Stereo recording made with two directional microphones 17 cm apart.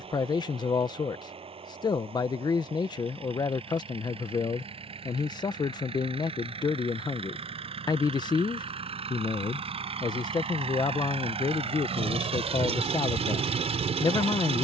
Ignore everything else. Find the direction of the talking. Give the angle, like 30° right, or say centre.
20° left.